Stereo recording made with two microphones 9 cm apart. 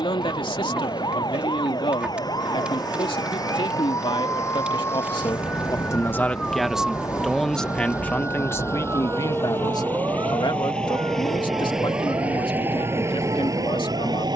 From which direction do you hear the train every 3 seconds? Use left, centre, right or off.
left, left, left, centre, right.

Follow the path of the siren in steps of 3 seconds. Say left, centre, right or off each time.
left, left, centre, right, right.